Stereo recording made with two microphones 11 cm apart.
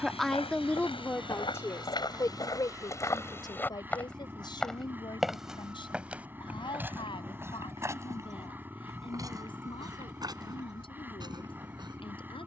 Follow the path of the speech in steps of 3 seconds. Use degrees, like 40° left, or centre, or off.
20° left, 40° left, 50° left, 50° left.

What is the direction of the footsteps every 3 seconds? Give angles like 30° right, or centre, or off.
40° left, 10° left, 20° right, 40° right.